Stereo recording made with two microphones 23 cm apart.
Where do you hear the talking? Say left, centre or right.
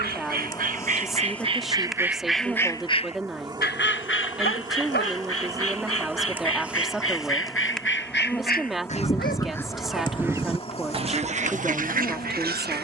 centre.